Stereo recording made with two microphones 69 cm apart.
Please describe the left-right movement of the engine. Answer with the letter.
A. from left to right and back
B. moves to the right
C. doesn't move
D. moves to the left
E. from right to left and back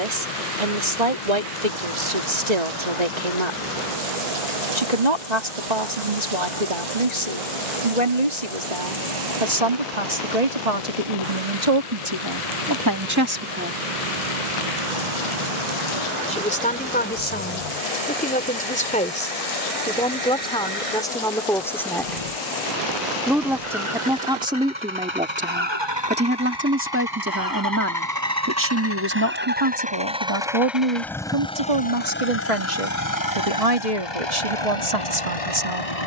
D.